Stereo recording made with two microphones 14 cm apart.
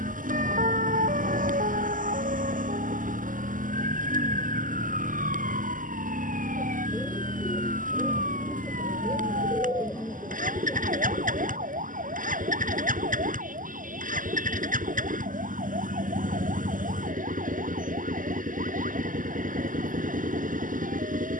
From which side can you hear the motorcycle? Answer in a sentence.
You can hear the motorcycle on the right.